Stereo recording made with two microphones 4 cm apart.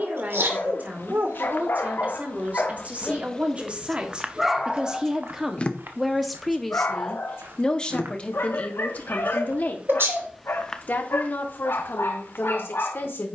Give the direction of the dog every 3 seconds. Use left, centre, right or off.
left, centre, left, left, left.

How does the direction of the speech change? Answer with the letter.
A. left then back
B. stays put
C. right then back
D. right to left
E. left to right
D.